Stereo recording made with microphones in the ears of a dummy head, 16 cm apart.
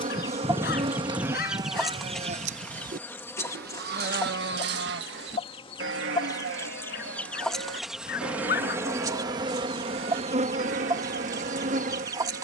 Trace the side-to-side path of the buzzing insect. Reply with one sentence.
In this clip you hear the buzzing insect move from right to left and back again.